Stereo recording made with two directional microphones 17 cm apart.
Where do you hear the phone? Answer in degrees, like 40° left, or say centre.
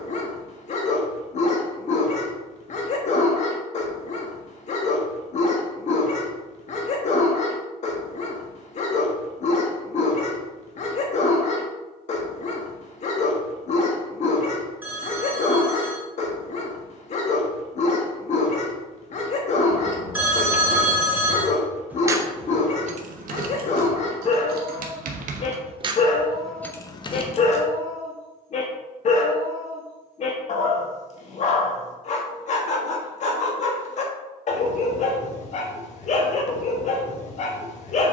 10° right.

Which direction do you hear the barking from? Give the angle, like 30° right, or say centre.
40° left.